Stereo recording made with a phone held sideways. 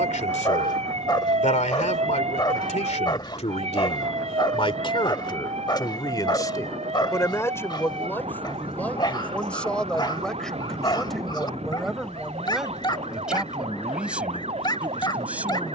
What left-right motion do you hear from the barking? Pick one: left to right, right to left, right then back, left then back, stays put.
stays put.